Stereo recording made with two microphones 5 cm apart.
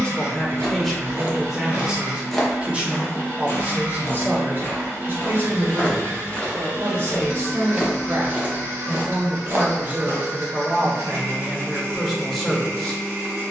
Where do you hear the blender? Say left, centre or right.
right.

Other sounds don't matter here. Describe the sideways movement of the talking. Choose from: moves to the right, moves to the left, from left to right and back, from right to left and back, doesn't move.
from left to right and back.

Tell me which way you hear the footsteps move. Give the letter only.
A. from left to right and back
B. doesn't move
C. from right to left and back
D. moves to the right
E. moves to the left
C.